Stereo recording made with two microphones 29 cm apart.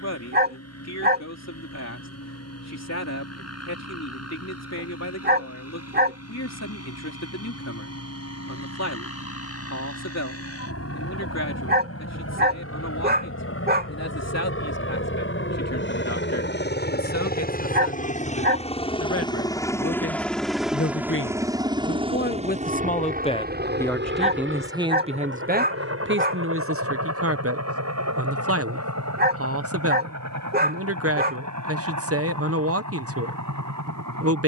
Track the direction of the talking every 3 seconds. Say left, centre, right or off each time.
left, left, left, left, left, left, left, left, right, right, right, right.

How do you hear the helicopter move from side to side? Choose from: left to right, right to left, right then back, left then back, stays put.
left to right.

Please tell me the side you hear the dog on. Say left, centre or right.
right.